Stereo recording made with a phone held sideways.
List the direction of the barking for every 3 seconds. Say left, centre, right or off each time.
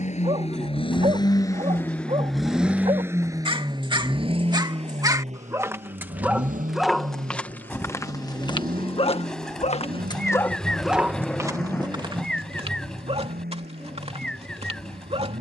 right, right, centre, centre, right.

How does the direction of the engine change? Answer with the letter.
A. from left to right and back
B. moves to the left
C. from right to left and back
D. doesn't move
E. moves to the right
E.